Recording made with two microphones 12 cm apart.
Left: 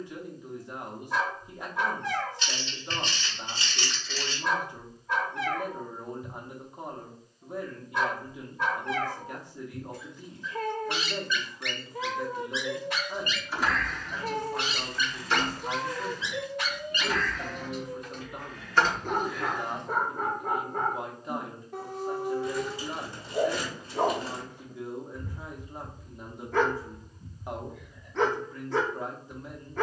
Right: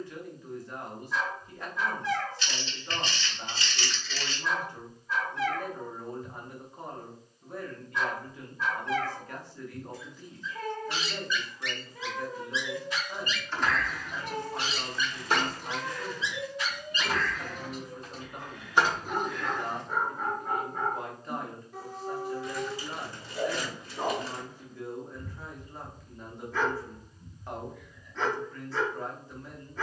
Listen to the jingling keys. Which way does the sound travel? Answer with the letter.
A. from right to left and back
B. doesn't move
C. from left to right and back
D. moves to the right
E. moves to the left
C.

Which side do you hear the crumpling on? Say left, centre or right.
left.